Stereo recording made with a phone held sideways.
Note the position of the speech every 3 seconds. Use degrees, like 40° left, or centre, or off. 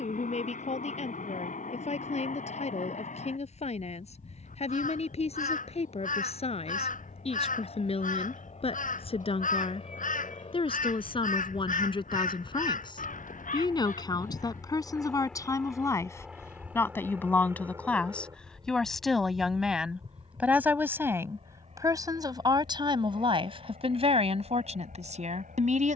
50° left, 50° left, 40° left, 40° left, 30° left, 20° left, centre, 30° right, 50° right.